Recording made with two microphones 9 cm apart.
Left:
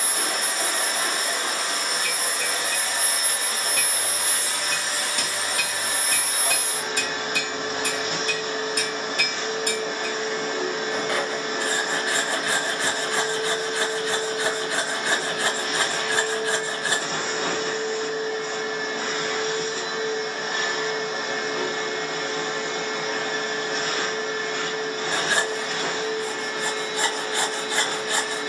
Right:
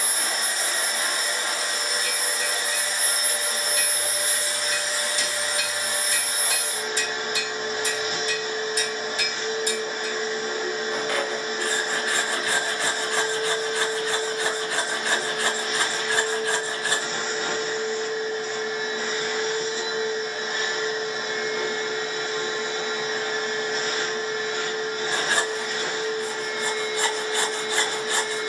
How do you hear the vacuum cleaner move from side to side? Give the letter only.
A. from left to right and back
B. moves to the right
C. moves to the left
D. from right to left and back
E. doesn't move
E.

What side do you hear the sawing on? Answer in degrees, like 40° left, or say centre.
20° left.